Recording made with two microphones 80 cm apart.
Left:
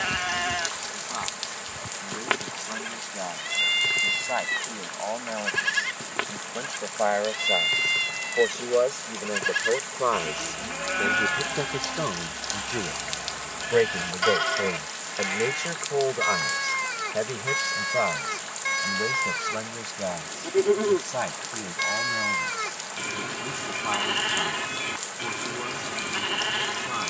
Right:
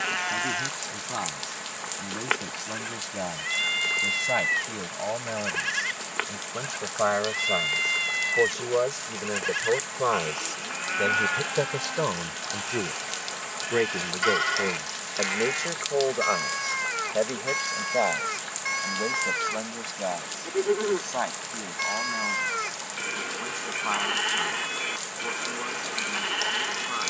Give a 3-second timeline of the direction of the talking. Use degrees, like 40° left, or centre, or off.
70° right, 60° right, 40° right, 20° right, 10° left, 30° left, 50° left, 60° left, 70° left.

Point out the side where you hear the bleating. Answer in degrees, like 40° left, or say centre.
60° left.